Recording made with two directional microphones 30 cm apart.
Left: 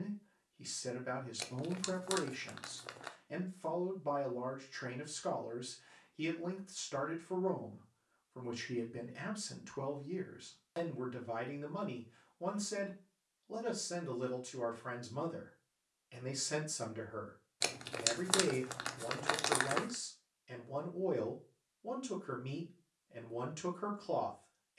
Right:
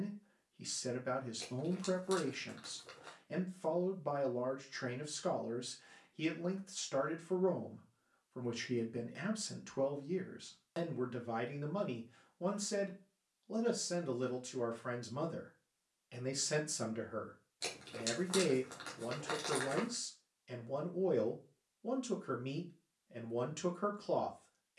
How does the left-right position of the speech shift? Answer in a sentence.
You can hear the speech stay put.